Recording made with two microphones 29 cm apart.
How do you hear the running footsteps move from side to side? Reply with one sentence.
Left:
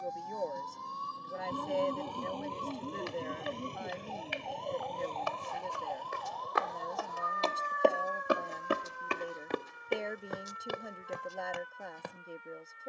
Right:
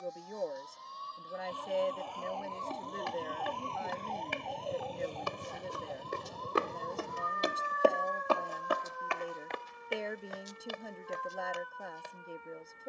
You can hear the running footsteps move to the left.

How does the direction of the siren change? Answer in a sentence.
You can hear the siren move to the right.